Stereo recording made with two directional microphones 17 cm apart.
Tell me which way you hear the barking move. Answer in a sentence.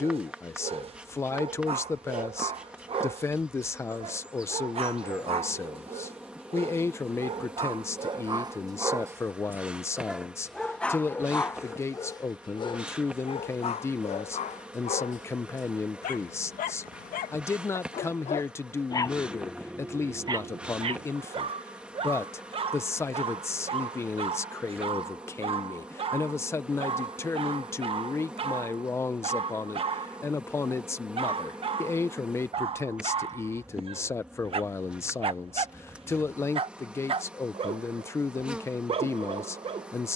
You can hear the barking move from right to left and back again.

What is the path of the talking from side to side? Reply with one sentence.
You can hear the talking stay in one place.